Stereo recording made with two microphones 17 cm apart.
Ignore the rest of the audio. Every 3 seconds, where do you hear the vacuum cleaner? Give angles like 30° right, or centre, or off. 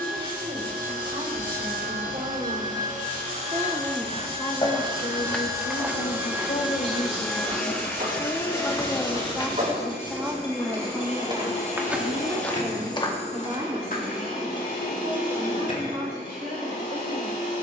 50° right, 30° right, centre, 30° left, 50° left, 50° left.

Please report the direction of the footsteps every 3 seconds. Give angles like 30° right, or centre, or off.
off, 20° left, 30° right, 30° right, 20° left, off.